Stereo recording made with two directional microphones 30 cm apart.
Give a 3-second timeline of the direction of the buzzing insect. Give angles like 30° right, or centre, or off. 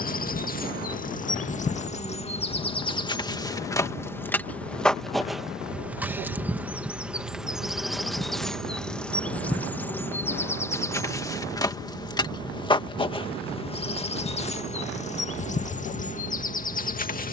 20° left, 10° left, centre, 10° left, 20° left, 30° left.